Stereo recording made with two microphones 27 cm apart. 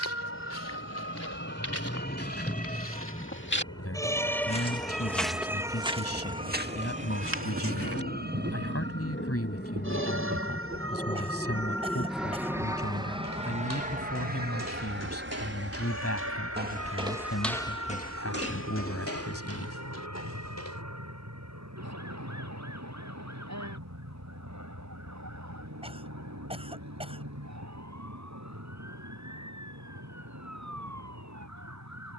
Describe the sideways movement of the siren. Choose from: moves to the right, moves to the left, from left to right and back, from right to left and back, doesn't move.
moves to the right.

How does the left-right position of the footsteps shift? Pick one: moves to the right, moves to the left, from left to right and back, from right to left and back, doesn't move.
from left to right and back.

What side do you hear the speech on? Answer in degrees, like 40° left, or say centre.
60° left.